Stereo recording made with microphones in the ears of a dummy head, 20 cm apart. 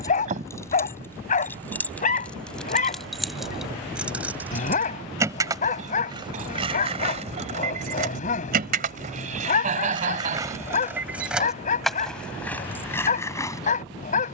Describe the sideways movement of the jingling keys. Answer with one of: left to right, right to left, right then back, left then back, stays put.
right then back.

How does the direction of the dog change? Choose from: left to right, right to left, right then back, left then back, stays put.
stays put.